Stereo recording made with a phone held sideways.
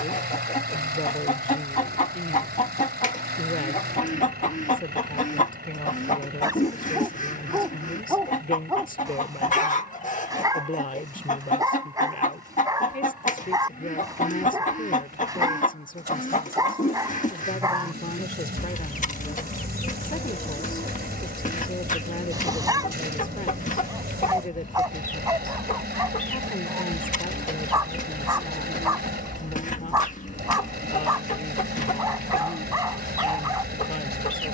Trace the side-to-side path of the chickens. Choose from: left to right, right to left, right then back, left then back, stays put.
stays put.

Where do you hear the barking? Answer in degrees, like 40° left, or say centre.
20° right.